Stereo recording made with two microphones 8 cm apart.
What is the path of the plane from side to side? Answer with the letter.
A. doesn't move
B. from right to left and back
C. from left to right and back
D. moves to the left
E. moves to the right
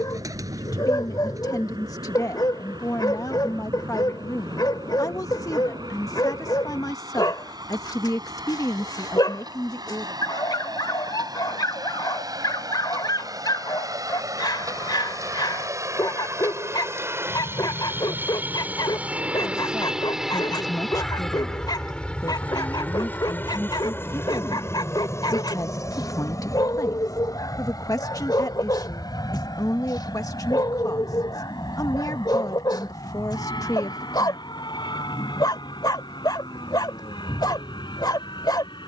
D.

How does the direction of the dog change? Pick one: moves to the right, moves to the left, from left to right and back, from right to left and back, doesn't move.
doesn't move.